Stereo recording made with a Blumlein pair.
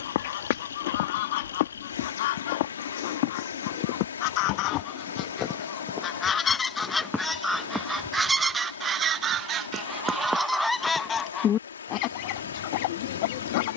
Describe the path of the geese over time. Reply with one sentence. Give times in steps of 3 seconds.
You can hear the geese on the left from 0 s, in the centre from 6 s and on the left from 12 s.